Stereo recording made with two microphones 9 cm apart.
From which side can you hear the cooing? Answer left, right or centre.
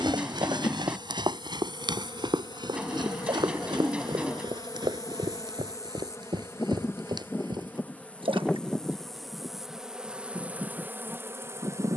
centre.